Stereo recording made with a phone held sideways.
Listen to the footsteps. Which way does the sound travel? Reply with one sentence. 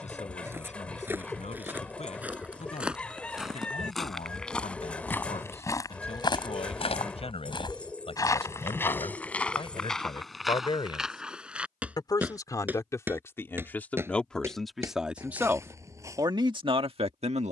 You can hear the footsteps go left and come back.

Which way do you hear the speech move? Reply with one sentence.
In this clip you hear the speech travel towards the right.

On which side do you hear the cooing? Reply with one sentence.
In this clip you hear the cooing in the centre.